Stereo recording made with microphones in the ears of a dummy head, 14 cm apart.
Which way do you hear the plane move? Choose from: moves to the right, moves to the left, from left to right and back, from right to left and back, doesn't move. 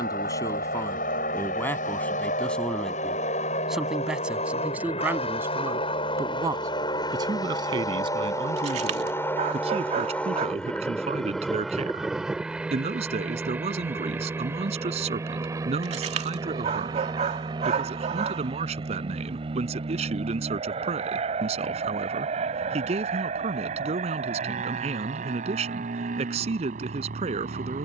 moves to the right.